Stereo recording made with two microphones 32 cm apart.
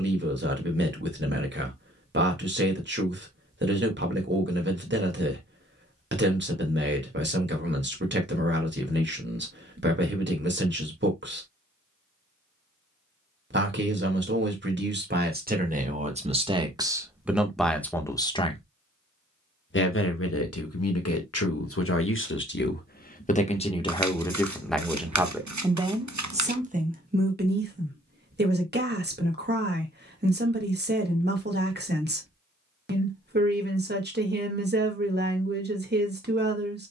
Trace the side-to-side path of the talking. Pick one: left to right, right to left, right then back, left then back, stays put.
left then back.